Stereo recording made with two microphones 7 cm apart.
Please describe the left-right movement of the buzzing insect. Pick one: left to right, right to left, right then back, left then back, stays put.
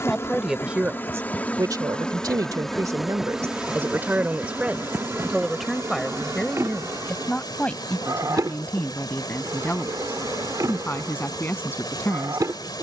left to right.